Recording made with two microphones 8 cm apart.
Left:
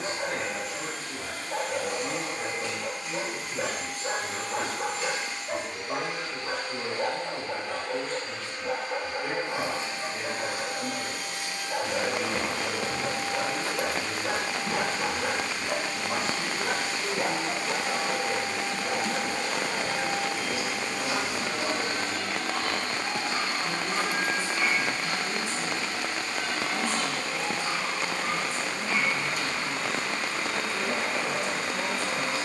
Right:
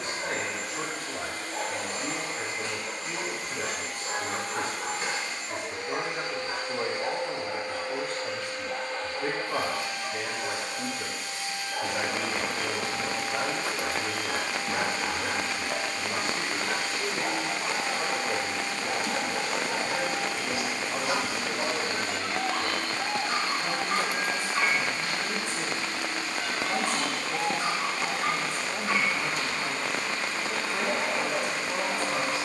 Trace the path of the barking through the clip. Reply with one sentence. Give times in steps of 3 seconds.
In this clip you hear the barking on the left from 0 s, in the centre from 18 s and on the right from 21 s.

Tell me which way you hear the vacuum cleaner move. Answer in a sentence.
In this clip you hear the vacuum cleaner move to the left.